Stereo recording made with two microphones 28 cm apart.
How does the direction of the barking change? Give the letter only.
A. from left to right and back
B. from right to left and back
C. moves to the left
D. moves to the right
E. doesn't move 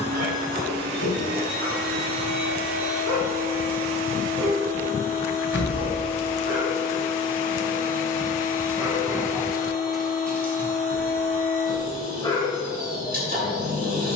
C.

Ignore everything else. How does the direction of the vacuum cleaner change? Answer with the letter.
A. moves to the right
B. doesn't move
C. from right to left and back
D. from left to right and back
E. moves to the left
B.